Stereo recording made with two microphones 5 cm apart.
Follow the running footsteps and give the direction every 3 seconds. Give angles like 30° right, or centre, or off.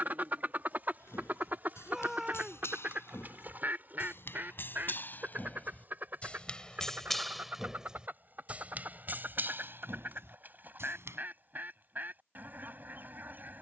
60° left, 50° left, centre, 50° right, off.